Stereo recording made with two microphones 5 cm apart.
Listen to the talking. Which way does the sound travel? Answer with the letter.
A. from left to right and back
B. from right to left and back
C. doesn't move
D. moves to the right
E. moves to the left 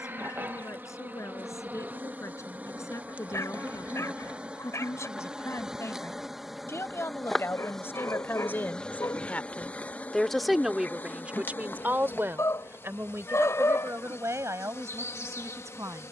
D.